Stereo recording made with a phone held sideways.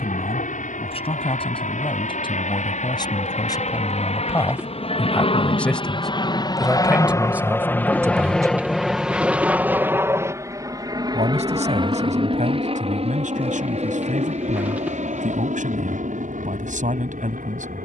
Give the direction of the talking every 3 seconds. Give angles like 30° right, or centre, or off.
40° left, 20° left, 10° right, 50° right, 60° right, 60° right.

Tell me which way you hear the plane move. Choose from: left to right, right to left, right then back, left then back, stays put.
left to right.